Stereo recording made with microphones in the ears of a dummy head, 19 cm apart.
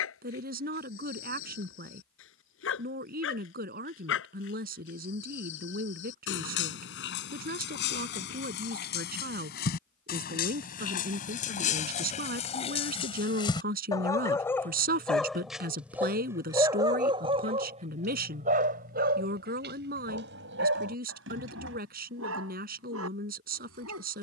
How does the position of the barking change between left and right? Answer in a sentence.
You can hear the barking move to the right.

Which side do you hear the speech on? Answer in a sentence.
In this clip you hear the speech on the right.